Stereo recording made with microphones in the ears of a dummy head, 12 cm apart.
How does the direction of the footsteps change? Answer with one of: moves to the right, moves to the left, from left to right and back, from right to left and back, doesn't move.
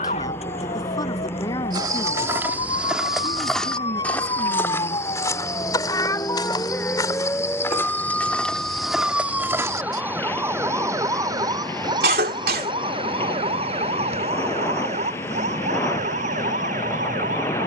from right to left and back.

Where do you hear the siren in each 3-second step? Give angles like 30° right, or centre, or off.
50° left, 30° left, 10° left, 20° right, 40° right, 60° right.